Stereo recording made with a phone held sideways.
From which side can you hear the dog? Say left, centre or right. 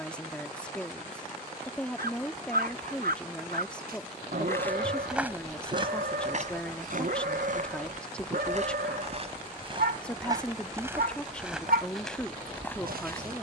right.